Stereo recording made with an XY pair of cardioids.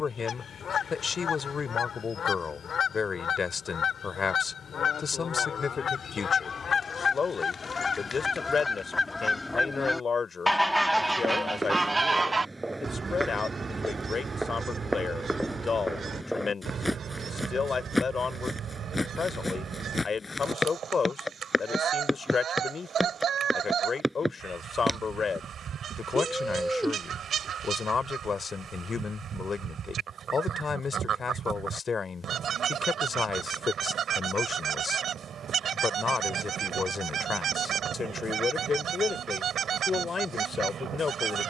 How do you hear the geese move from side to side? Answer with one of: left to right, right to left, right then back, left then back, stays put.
left to right.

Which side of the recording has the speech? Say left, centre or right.
left.